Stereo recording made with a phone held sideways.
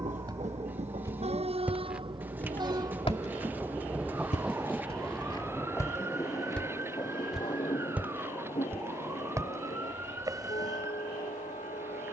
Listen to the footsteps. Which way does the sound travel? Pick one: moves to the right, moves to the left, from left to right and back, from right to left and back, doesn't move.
from right to left and back.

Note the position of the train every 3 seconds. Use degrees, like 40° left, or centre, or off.
40° right, centre, 30° left, 50° left.